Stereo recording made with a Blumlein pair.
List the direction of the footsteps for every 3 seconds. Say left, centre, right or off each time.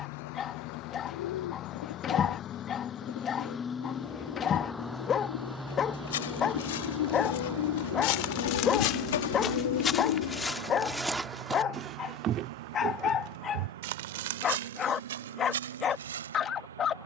off, off, left, centre, right, right.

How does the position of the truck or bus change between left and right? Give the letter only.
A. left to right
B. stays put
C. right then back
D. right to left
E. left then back
A.